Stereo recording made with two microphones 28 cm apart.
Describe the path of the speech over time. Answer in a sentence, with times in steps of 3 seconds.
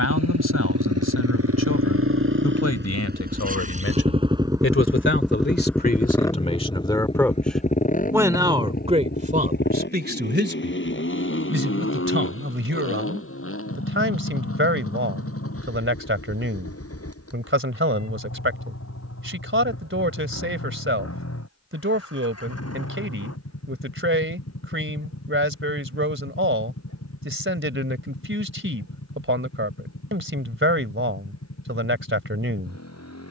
In this clip you hear the speech on the left from 0 s, in the centre from 6 s and on the right from 9 s.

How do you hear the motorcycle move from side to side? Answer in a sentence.
You can hear the motorcycle travel towards the left.